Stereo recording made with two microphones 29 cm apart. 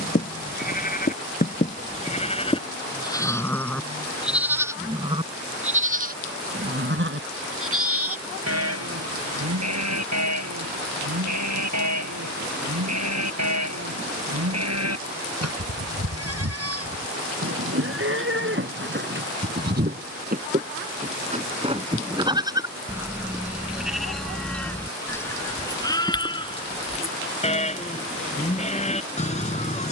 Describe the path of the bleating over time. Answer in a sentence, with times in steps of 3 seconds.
You can hear the bleating on the left from 0 s, in the centre from 3 s, on the right from 6 s, in the centre from 21 s and on the left from 27 s.